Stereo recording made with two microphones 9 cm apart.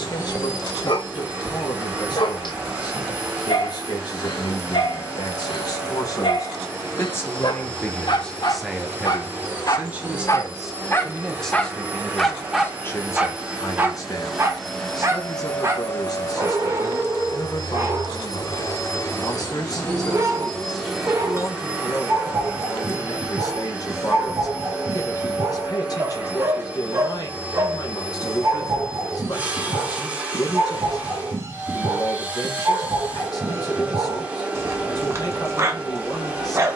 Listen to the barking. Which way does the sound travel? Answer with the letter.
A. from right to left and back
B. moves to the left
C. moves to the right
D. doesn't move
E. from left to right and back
C.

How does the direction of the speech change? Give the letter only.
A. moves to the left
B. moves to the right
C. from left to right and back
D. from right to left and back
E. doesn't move
C.